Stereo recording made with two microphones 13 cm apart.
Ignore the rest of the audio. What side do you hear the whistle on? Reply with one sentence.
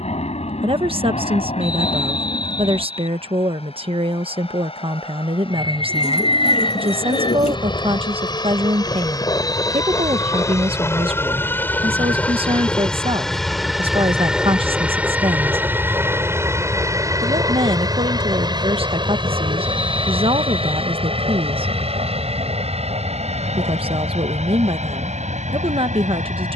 In this clip you hear the whistle on the left.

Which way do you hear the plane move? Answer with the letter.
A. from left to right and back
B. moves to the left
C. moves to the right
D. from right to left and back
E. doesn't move
C.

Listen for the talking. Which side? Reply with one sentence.
In this clip you hear the talking on the right.